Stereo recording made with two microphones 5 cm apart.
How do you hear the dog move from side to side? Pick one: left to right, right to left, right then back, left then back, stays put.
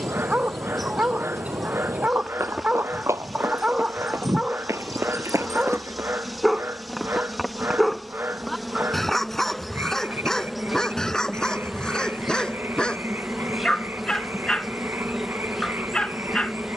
right to left.